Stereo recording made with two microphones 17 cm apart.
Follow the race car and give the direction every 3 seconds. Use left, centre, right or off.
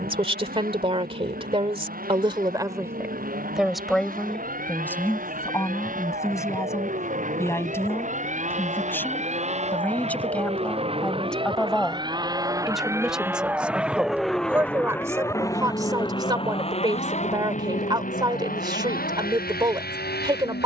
right, right, right, right, centre, left, left.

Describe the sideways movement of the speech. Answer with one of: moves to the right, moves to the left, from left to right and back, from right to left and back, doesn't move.
from right to left and back.